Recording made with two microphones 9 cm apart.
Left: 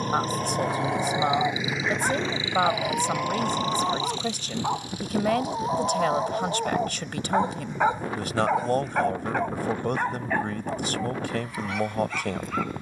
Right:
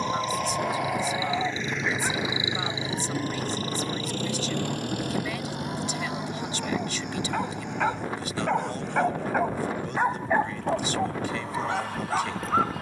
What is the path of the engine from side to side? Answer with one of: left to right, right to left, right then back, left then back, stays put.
left to right.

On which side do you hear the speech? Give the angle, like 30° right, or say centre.
60° left.